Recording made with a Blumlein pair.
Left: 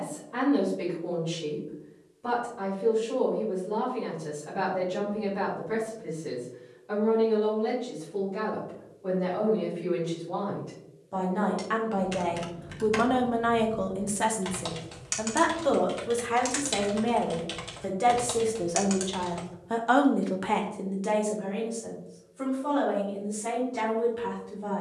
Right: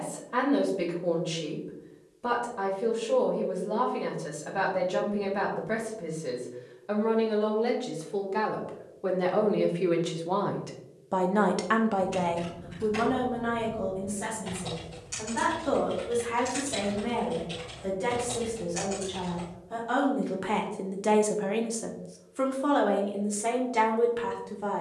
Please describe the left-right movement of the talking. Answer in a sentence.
In this clip you hear the talking move from right to left and back again.